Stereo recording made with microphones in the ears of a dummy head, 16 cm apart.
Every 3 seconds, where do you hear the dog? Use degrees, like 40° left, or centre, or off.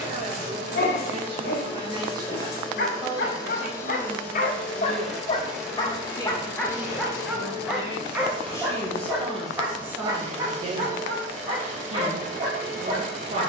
50° left, 40° left, centre, 20° right, 30° right.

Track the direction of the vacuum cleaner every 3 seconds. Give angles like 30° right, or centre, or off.
30° left, 10° left, 20° right, 40° right, 40° right.